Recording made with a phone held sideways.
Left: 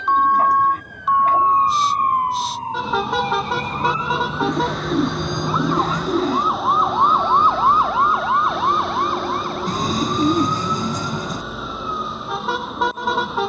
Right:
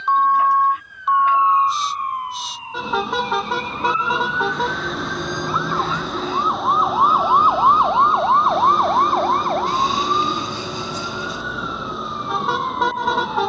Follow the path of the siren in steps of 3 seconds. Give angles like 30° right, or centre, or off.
50° left, 30° left, 10° right, 60° right, 70° right.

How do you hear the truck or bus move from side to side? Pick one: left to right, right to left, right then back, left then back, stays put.
stays put.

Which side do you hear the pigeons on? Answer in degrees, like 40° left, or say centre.
40° left.